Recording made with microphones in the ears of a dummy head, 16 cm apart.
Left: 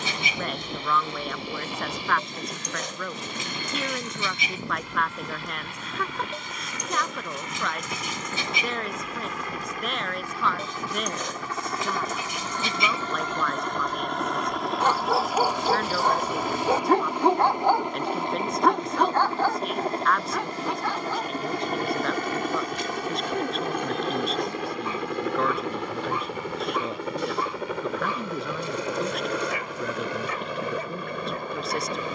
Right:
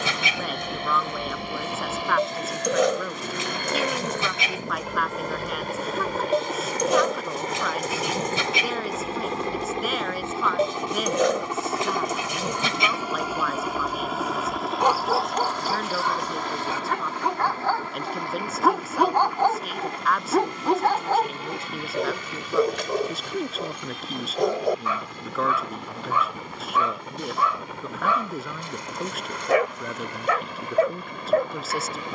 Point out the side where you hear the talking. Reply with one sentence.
You can hear the talking in the centre.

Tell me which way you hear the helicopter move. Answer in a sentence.
In this clip you hear the helicopter move from right to left.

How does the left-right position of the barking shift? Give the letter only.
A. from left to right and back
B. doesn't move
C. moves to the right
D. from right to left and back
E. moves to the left
D.